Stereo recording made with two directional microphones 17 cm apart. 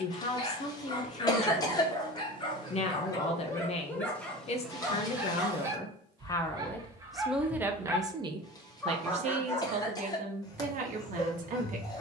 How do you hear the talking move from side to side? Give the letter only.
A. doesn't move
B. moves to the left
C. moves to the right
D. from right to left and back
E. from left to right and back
C.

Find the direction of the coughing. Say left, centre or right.
left.